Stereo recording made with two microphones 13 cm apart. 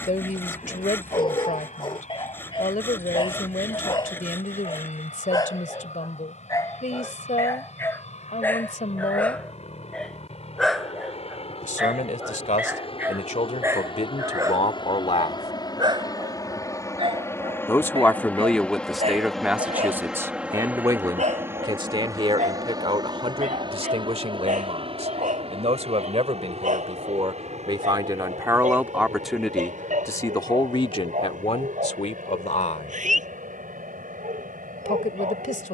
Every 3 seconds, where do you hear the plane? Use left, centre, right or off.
left, left, left, left, left, left, centre, right, right, right, right, right.